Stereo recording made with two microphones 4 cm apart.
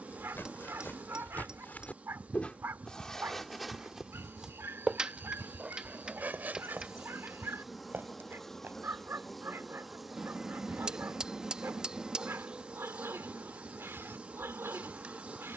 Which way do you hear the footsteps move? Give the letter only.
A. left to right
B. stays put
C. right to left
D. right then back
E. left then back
A.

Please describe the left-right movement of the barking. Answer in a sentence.
You can hear the barking stay in one place.